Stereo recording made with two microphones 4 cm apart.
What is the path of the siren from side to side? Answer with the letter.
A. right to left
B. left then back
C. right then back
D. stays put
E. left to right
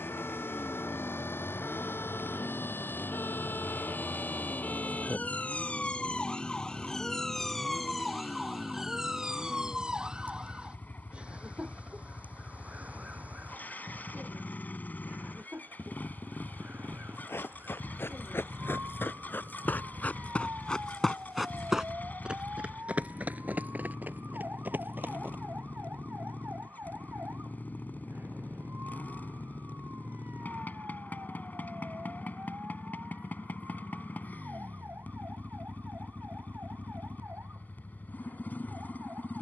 E.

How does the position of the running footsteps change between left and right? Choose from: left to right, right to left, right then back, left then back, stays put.
left to right.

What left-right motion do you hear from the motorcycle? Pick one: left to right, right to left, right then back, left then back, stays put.
stays put.